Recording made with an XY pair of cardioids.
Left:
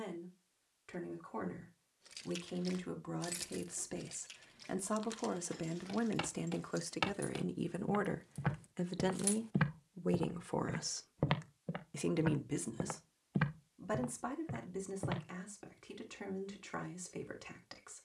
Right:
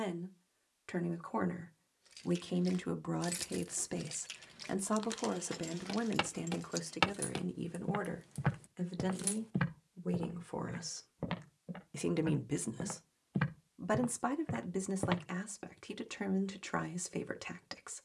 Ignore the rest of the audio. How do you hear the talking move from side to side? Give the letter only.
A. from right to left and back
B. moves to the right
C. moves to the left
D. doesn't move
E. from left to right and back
A.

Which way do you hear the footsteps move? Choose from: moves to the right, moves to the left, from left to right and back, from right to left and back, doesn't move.
from right to left and back.